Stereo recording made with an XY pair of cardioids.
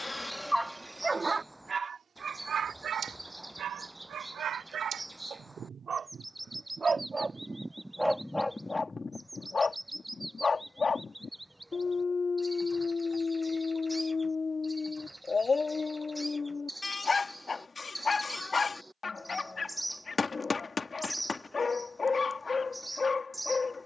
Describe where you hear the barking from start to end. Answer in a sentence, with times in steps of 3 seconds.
You can hear the barking on the right from 0 s, in the centre from 6 s and on the left from 9 s.